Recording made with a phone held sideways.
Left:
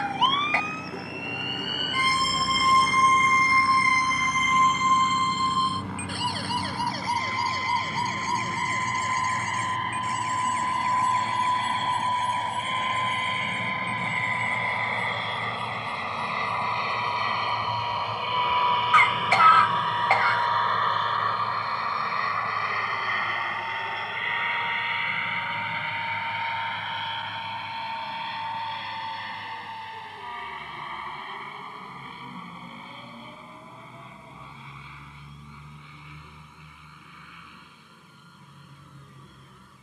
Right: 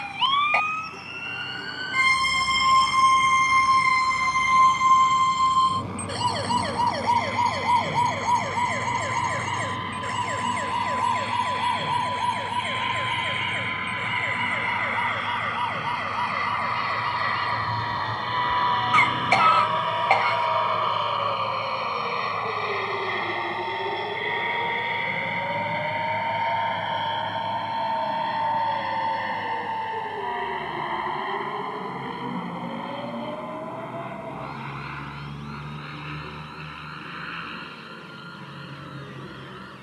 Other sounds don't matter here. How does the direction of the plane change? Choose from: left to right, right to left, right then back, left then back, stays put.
left to right.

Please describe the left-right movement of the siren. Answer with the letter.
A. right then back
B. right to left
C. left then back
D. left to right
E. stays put
D.